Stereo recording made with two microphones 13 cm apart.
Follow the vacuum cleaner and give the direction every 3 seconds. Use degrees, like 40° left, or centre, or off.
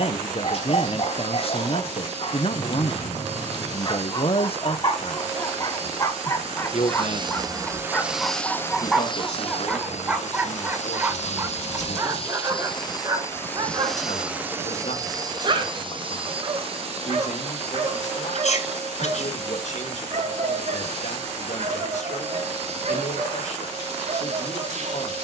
60° right, 60° right, 20° right, 60° left, 10° left, 50° right, 50° right, 50° right, 50° right.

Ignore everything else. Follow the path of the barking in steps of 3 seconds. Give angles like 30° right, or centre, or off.
50° left, 30° left, 10° left, 10° right, 30° right, 50° right, 60° right, 60° right, 60° right.